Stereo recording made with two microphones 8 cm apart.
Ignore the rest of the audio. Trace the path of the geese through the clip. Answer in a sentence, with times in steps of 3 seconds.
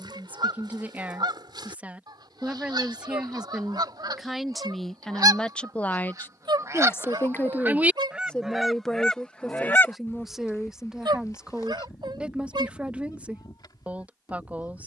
You can hear the geese on the right from 0 s and on the left from 9 s.